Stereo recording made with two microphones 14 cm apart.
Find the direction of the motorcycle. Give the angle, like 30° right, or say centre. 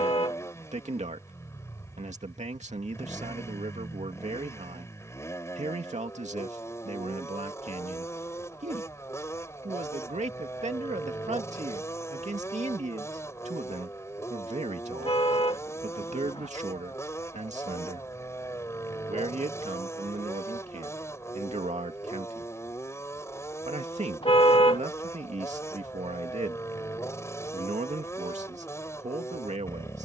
20° left.